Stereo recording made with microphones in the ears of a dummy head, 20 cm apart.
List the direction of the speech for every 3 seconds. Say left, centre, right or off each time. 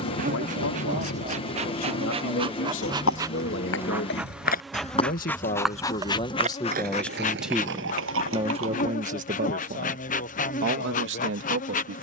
left, left, centre, right.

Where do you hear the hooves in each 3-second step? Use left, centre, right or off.
left, left, right, off.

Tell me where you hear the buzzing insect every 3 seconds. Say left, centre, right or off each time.
right, centre, left, left.